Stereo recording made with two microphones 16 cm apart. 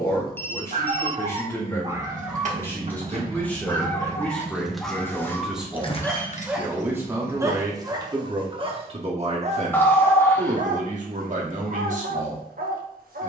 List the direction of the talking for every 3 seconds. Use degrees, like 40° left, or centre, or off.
10° left, centre, 20° right, 50° right, 50° right.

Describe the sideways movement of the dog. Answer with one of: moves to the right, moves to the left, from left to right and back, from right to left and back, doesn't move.
from right to left and back.